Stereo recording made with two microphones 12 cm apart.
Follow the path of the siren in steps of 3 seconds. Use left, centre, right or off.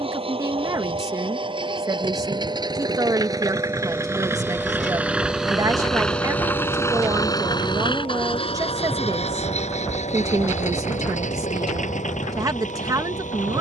right, centre, left, left, left.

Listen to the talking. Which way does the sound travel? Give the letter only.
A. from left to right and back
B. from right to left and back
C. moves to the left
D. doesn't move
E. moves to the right
D.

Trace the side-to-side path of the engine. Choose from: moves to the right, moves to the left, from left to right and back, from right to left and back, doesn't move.
moves to the left.